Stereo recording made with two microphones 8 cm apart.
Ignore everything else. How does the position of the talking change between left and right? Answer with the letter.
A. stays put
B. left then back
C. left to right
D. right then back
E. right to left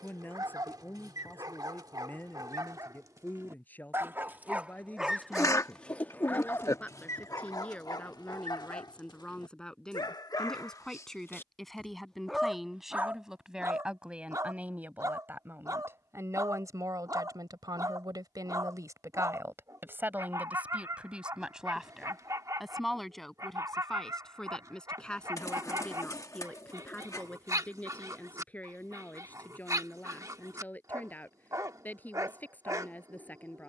D.